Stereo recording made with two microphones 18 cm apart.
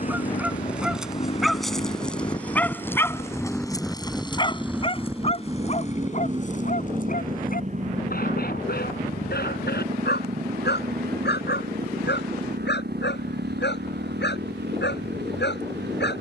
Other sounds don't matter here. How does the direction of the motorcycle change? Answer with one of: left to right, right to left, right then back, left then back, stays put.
left to right.